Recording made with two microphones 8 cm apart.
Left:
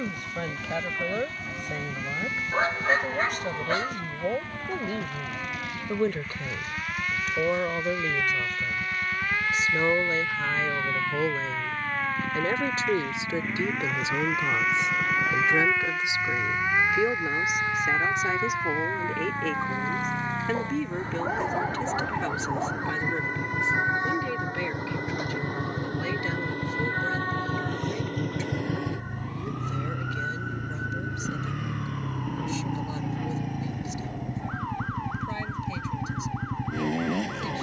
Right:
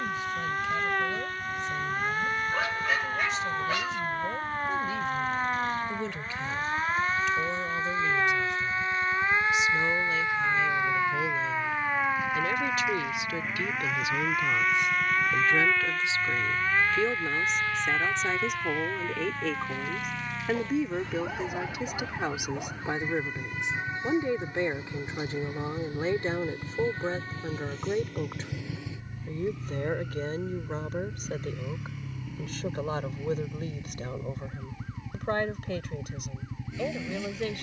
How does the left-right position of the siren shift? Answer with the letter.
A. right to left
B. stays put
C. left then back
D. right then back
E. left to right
A.